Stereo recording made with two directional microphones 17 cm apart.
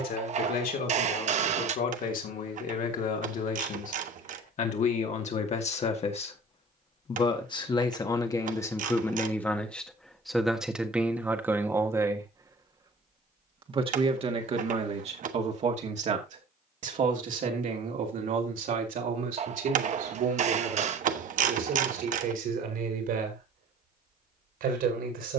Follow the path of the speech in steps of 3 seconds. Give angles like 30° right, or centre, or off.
60° left, 50° left, 30° left, centre, 30° right, 50° right, 60° right, 60° right, 70° right.